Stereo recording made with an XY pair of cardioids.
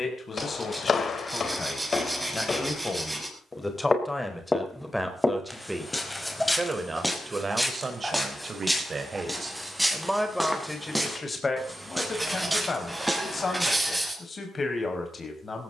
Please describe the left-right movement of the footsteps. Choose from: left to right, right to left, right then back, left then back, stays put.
left to right.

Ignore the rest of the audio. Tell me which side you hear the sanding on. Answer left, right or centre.
centre.